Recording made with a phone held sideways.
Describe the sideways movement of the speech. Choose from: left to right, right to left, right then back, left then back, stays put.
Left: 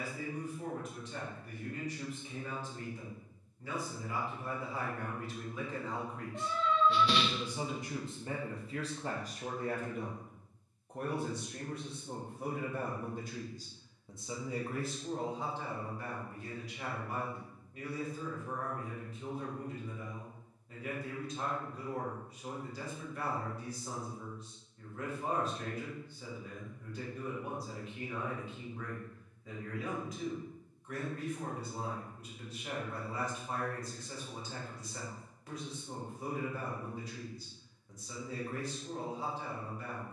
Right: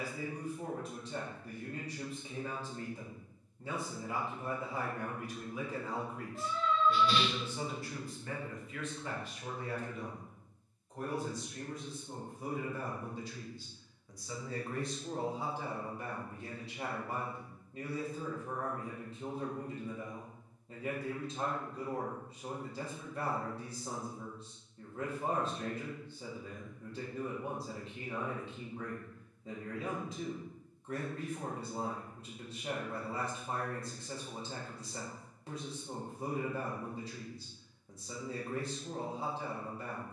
left then back.